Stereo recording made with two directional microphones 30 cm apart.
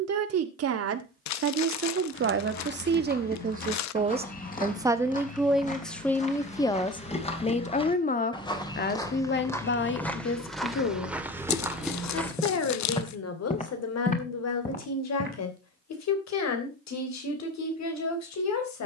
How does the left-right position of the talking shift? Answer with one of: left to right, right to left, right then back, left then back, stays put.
right to left.